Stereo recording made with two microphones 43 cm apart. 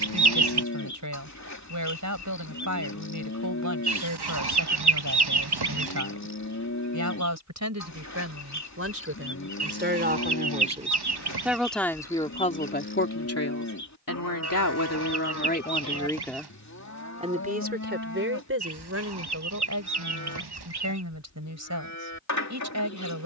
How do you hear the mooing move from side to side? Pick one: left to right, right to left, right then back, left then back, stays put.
stays put.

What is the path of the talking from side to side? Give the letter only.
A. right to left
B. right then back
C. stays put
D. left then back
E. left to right
D.